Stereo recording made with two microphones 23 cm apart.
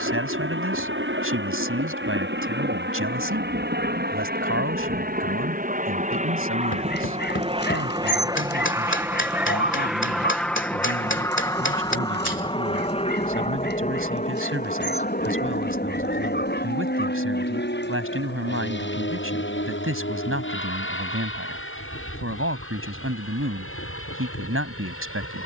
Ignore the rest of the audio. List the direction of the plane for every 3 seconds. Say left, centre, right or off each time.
right, right, right, centre, left, left, left, left, left.